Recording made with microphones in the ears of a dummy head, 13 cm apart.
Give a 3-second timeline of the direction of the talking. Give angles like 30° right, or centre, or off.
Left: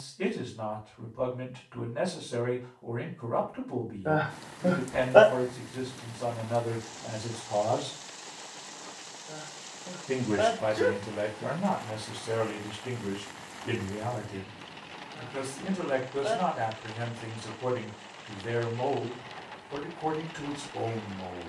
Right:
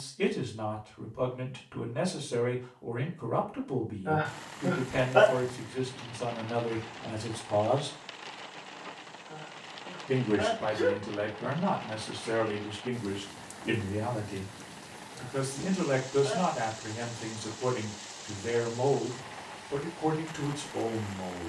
20° right, 20° right, 20° right, 20° left, centre, 20° right, 20° right.